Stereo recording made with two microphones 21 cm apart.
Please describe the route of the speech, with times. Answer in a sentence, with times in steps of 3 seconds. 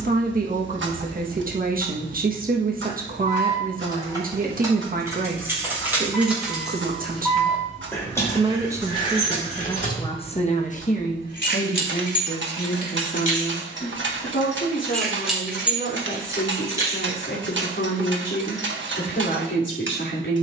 In this clip you hear the speech on the right from 0 s and on the left from 9 s.